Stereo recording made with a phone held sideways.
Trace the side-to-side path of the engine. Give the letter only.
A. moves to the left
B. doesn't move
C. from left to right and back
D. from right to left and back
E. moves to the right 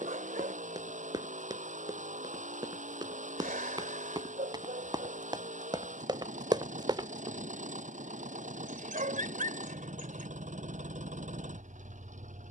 B.